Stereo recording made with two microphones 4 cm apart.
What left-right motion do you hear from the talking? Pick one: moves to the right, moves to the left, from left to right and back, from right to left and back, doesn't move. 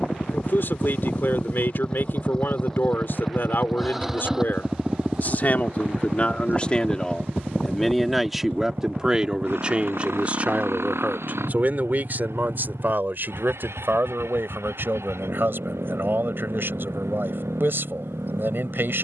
moves to the right.